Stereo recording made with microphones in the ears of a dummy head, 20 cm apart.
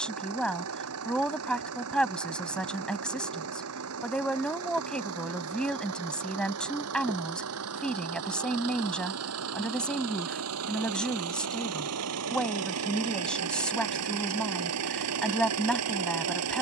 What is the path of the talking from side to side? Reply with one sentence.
You can hear the talking stay put.